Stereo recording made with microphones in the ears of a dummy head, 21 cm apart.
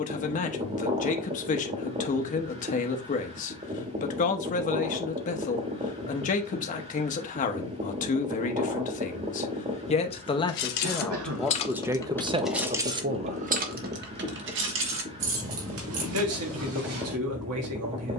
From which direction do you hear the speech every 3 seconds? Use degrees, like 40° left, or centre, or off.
30° left, 30° left, 30° left, 10° left, 30° right, 70° right.